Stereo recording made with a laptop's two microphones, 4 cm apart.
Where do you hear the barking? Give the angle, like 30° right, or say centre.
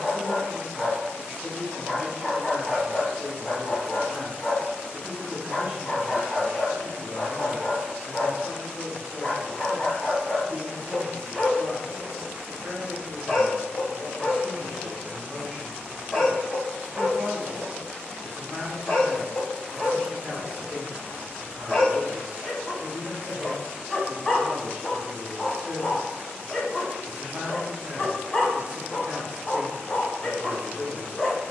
10° left.